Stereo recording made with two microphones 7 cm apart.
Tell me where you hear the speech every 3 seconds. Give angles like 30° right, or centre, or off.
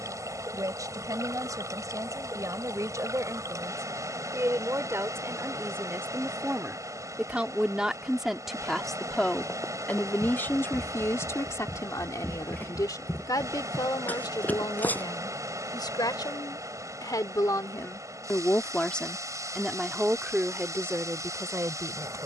50° right, 40° right, 10° right, 30° left, 60° left, 60° left, centre, 40° right.